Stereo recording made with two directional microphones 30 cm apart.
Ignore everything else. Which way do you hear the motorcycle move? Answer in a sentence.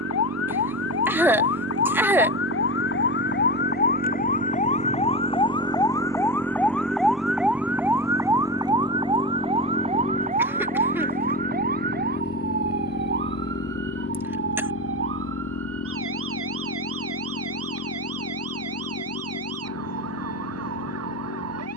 In this clip you hear the motorcycle go from the right side to the left.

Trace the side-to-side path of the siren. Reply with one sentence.
In this clip you hear the siren go from the left side to the right.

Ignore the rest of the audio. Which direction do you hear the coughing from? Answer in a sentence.
You can hear the coughing in the centre.